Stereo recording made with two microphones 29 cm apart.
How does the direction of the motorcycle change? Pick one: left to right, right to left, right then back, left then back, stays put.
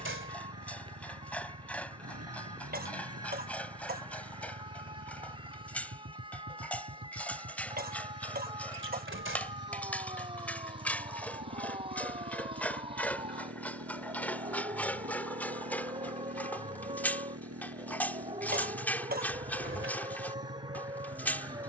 stays put.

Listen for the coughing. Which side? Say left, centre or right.
right.